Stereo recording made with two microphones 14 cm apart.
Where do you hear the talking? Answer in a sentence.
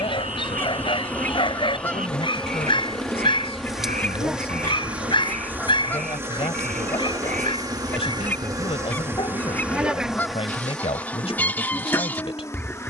You can hear the talking on the left.